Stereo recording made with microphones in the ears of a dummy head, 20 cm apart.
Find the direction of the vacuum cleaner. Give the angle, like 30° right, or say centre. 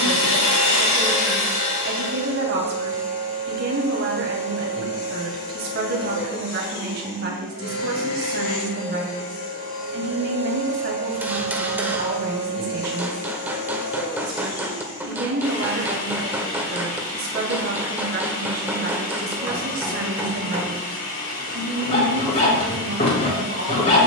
40° left.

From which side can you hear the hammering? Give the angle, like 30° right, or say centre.
10° right.